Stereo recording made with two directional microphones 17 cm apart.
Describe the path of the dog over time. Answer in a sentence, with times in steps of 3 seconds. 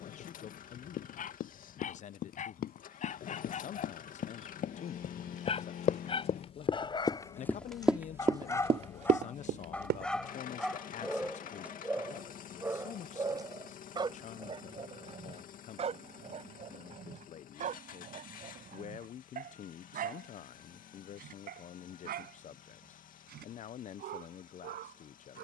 You can hear the dog on the left from 0 s, in the centre from 9 s and on the right from 12 s.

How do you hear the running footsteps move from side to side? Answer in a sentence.
In this clip you hear the running footsteps travel towards the right.